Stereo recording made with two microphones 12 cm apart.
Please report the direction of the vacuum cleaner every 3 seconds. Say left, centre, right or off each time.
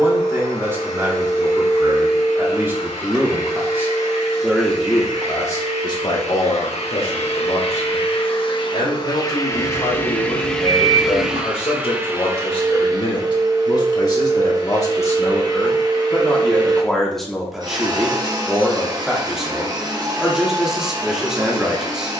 left, left, left, centre, right, right, right, right.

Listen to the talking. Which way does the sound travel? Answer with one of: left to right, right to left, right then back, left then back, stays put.
left then back.